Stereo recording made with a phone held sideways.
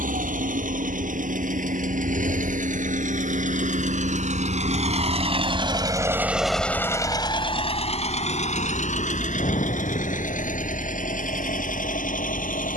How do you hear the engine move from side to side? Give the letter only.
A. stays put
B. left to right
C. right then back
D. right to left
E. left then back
D.